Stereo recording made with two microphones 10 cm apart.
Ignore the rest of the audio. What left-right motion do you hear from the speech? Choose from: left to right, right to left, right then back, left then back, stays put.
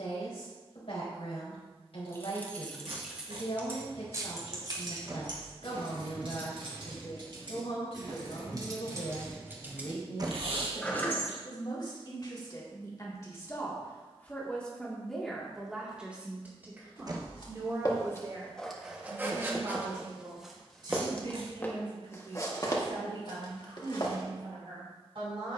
left to right.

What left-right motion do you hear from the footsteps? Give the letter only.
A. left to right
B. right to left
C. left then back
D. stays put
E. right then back
E.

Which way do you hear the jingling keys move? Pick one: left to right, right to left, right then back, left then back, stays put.
right then back.